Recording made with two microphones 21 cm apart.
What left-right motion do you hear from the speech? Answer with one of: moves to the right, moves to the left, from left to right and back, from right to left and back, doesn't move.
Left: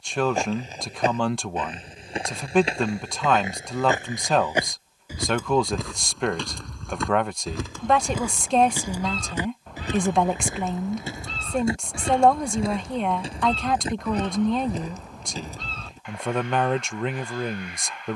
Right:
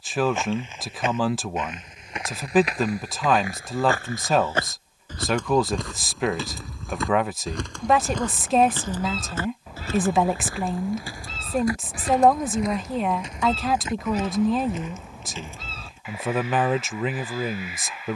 doesn't move.